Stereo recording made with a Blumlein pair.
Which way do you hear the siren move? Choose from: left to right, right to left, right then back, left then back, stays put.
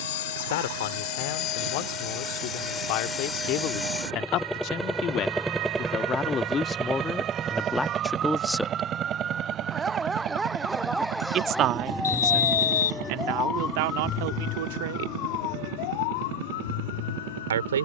right to left.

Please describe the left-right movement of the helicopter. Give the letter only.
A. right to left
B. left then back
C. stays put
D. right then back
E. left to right
E.